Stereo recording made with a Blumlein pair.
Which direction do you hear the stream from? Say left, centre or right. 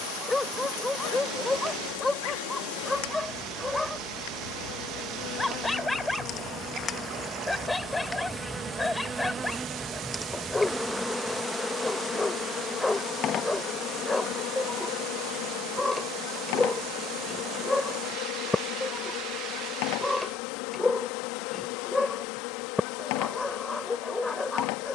right.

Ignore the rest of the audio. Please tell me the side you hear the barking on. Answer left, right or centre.
centre.